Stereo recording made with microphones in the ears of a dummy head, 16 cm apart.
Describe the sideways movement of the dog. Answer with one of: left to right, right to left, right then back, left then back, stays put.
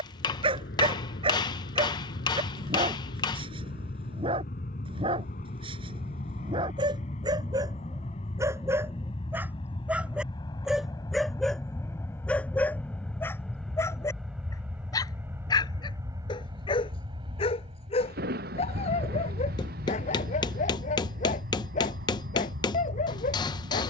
right to left.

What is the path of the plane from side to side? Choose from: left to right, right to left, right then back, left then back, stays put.
left to right.